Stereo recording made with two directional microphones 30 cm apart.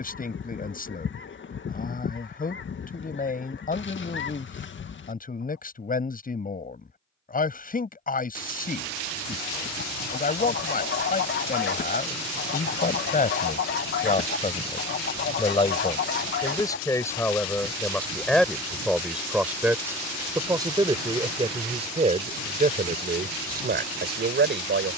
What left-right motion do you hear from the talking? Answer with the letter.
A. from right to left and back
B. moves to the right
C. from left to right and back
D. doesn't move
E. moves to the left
B.